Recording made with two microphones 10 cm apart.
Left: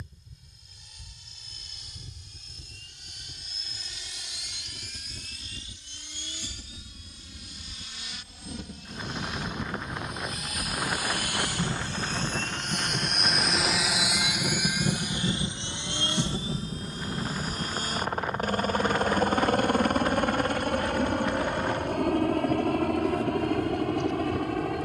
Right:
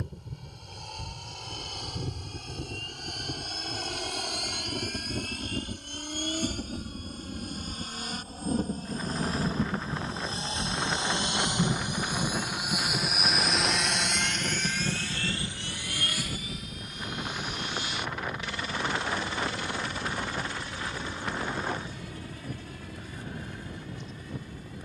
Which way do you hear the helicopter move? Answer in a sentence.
You can hear the helicopter move from right to left.